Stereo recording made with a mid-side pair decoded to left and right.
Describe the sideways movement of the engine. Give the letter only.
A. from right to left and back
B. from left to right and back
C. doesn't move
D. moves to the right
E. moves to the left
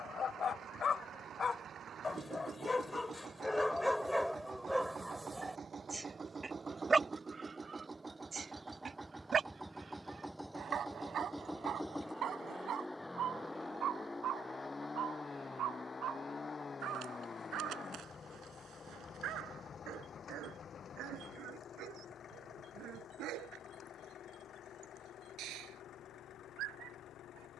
E.